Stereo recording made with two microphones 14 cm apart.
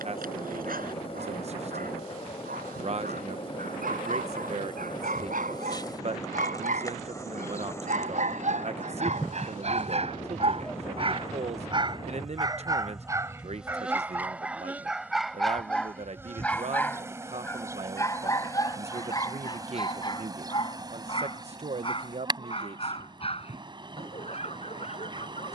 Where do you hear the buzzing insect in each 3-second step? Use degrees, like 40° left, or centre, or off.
40° left, 30° left, 20° left, 10° left, 10° right, 20° right, 30° right, 30° right, 30° right.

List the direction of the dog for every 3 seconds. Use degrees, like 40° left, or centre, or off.
80° right, 70° right, 60° right, 40° right, 20° right, 10° left, 30° left, 40° left, 50° left.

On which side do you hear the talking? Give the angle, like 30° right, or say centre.
50° right.